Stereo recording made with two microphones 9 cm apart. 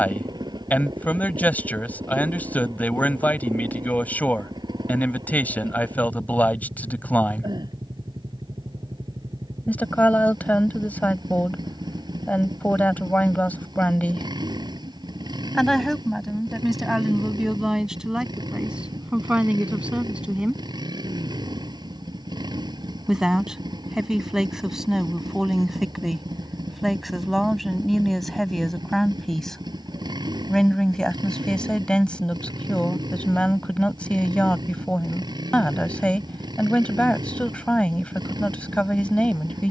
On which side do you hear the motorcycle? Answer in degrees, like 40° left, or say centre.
50° right.